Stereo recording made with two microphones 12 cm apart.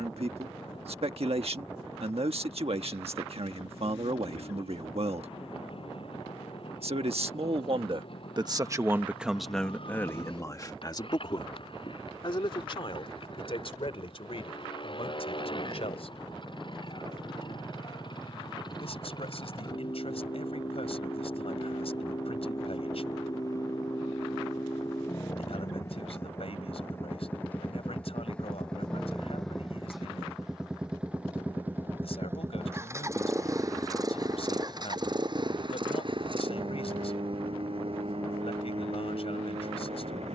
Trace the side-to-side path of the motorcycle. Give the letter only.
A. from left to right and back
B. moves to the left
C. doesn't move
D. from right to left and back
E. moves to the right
E.